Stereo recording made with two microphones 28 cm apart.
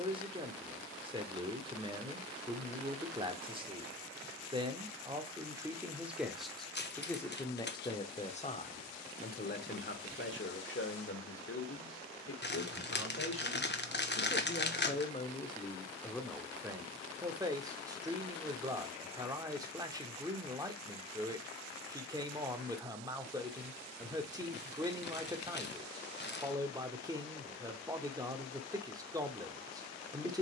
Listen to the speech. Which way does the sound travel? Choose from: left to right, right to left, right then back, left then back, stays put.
left then back.